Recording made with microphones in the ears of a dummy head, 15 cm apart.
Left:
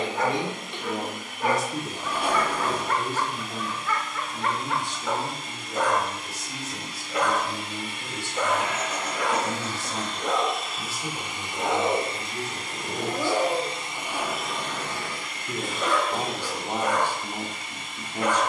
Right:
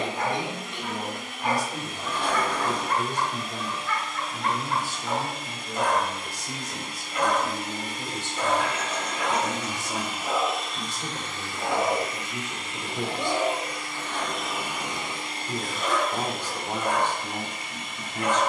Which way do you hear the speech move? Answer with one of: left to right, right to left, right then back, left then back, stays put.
right then back.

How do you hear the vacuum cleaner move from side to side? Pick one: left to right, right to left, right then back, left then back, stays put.
left then back.